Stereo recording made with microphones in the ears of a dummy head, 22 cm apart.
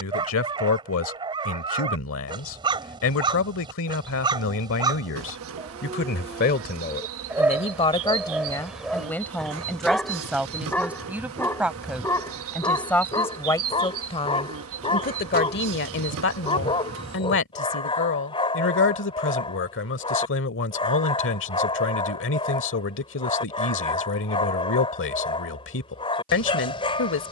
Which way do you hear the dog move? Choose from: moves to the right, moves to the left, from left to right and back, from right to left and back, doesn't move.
moves to the left.